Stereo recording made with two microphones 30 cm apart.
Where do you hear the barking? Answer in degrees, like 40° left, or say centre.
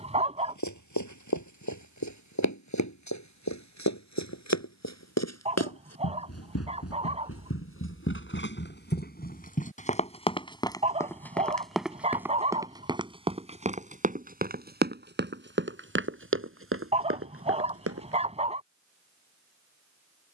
20° right.